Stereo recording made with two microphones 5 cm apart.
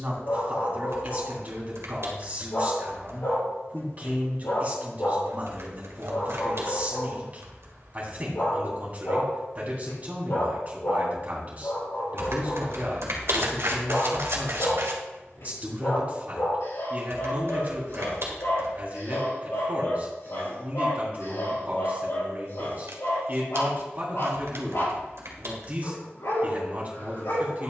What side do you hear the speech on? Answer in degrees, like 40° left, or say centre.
30° right.